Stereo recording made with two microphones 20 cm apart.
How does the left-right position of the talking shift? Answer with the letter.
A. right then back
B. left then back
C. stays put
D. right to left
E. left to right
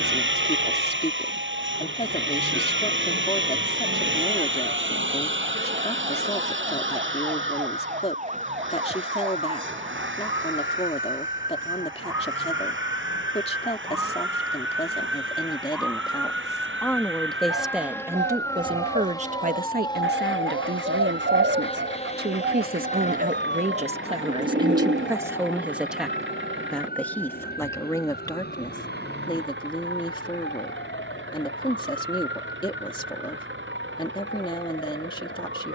A.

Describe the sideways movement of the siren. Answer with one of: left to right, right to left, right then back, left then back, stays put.
right to left.